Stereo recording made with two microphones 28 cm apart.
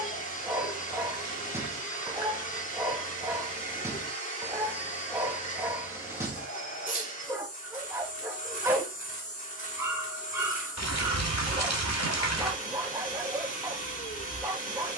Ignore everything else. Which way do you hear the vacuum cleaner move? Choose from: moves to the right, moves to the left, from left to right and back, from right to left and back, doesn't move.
doesn't move.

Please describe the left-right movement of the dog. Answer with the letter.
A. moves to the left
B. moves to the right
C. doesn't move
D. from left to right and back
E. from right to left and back
C.